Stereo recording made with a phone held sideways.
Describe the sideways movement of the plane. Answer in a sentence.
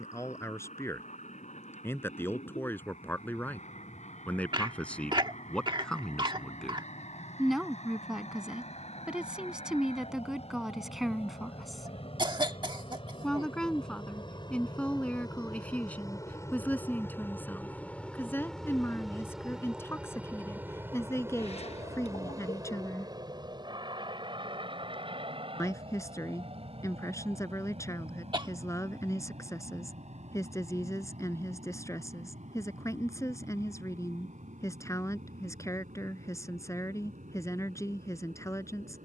In this clip you hear the plane go from the left side to the right.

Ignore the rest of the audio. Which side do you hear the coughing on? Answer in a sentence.
You can hear the coughing on the right.